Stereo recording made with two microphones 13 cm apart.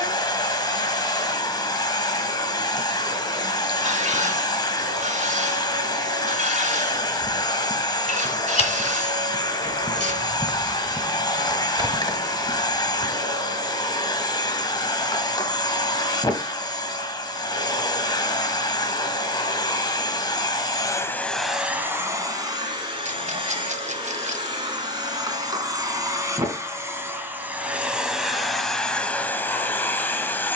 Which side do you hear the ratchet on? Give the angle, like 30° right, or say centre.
60° right.